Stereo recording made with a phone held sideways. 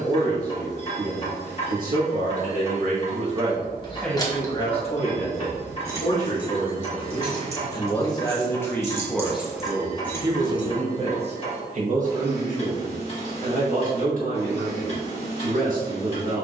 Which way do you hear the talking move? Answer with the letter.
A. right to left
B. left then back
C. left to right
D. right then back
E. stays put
B.